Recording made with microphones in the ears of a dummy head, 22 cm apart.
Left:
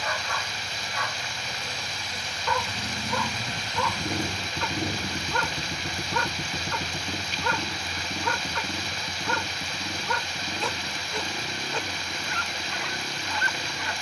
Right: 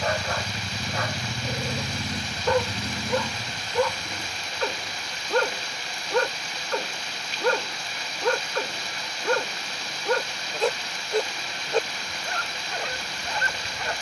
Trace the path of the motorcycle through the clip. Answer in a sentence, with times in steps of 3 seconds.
In this clip you hear the motorcycle on the right from 0 s and on the left from 3 s.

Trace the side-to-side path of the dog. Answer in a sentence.
In this clip you hear the dog stay put.